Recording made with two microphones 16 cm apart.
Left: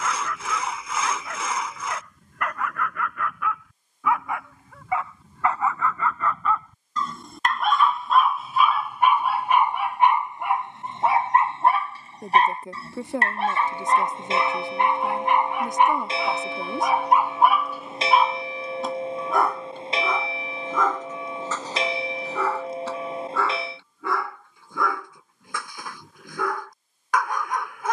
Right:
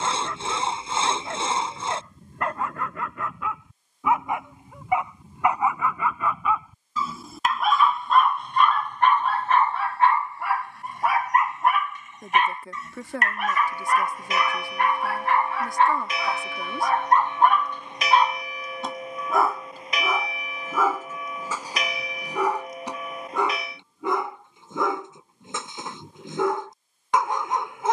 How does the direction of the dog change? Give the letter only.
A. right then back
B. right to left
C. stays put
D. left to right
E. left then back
E.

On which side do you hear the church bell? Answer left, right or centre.
left.